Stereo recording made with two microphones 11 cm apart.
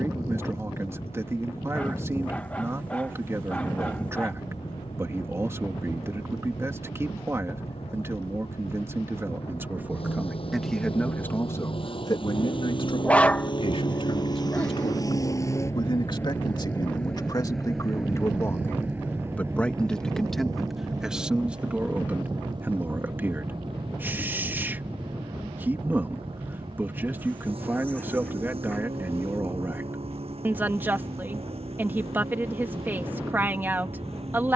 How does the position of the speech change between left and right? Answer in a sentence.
You can hear the speech move from right to left and back again.